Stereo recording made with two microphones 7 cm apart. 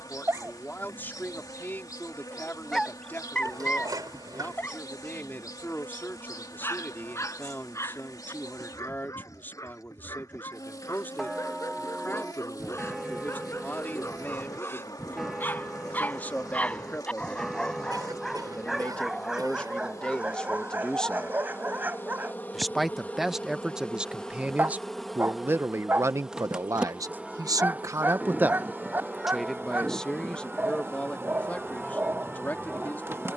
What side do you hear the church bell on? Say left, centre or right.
centre.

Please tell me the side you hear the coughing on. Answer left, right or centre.
right.